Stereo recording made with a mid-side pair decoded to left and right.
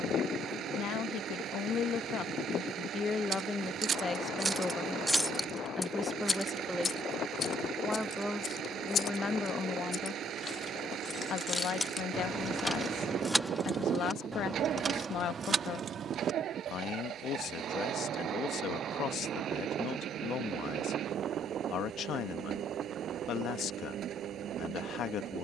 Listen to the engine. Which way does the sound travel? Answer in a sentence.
In this clip you hear the engine stay put.